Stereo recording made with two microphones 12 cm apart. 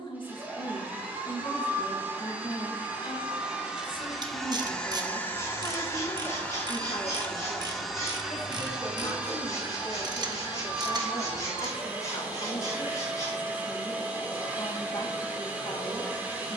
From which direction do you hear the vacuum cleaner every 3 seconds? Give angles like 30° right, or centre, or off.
20° right, 10° left, 10° left, 10° right, 10° right, 10° right.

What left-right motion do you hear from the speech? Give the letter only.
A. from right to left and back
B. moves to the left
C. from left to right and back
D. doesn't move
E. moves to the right
D.